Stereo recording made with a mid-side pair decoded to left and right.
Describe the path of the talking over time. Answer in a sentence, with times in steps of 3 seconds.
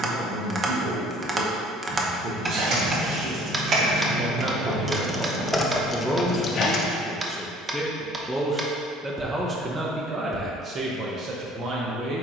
In this clip you hear the talking on the right from 0 s, in the centre from 6 s and on the right from 9 s.